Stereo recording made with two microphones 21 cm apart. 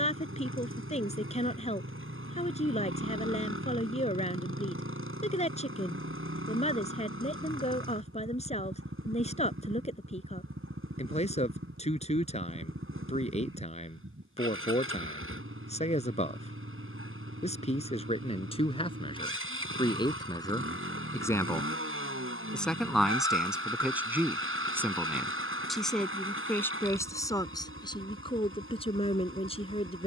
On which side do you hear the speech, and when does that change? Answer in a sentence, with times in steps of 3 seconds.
In this clip you hear the speech on the left from 0 s, in the centre from 21 s and on the left from 27 s.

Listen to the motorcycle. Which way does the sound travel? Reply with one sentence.
You can hear the motorcycle stay put.